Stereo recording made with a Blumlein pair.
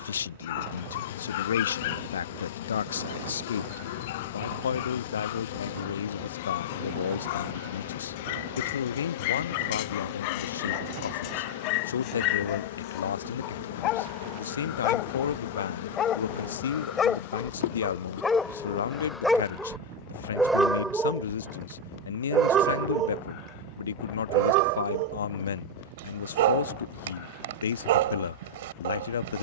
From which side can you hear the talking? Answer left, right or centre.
left.